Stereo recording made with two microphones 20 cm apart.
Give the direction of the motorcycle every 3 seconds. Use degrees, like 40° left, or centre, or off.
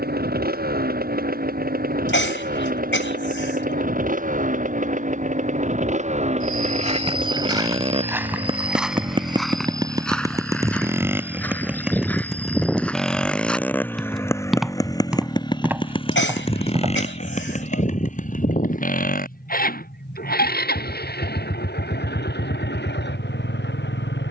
50° right, 40° right, 30° right, 20° right, 10° left, 30° left, 50° left, 60° left.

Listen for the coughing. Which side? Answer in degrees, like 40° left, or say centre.
80° left.